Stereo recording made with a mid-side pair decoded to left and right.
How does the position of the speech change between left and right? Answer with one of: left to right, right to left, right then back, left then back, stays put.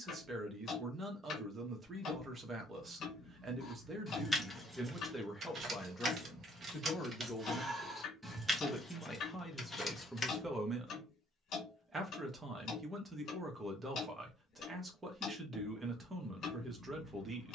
left then back.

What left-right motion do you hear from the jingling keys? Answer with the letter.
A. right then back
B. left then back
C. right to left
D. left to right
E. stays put
A.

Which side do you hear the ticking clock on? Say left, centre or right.
left.